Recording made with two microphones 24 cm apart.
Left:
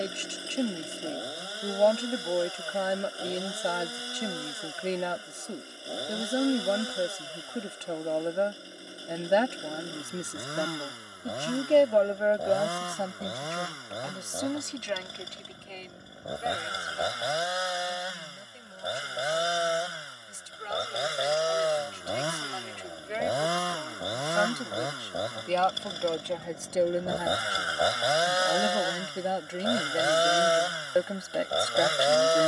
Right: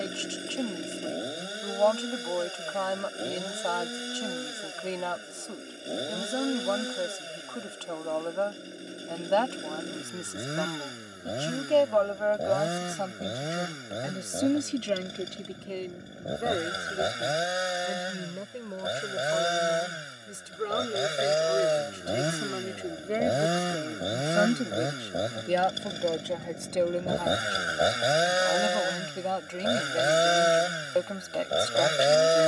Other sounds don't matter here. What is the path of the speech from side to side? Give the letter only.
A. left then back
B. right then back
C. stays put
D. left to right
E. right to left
B.